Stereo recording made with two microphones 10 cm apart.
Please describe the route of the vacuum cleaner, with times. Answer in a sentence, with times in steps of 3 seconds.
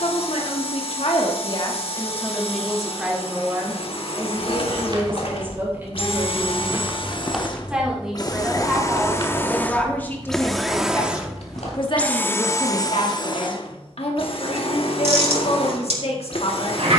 You can hear the vacuum cleaner on the left from 0 s, in the centre from 9 s and on the left from 12 s.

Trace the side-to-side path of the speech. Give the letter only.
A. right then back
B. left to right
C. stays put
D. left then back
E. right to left
A.